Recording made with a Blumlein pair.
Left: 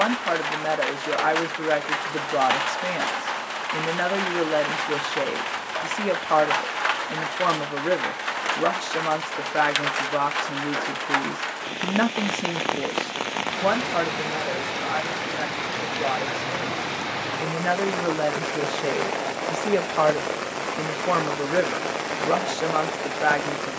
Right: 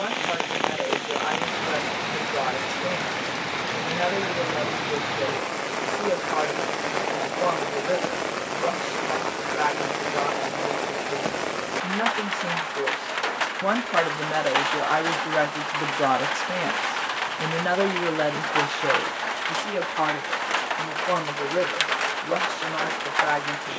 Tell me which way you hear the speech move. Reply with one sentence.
You can hear the speech move from left to right and back again.